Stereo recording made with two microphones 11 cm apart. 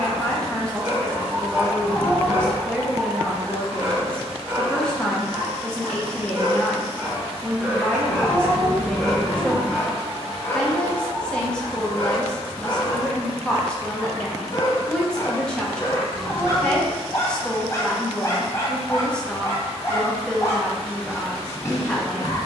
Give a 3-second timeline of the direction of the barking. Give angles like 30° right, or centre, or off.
20° right, 20° right, 10° right, 20° left, 30° left, 30° left, 30° left, 30° left.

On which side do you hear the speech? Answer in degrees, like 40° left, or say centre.
10° left.